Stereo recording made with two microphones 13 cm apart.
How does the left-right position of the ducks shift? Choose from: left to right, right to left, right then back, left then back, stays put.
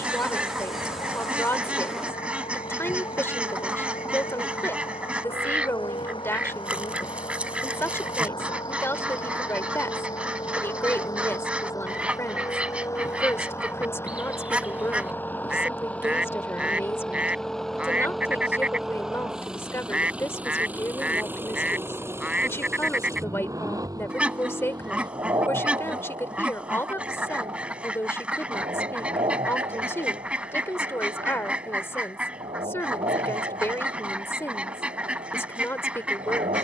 stays put.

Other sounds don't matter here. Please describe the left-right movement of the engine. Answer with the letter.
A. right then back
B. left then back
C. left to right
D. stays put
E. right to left
C.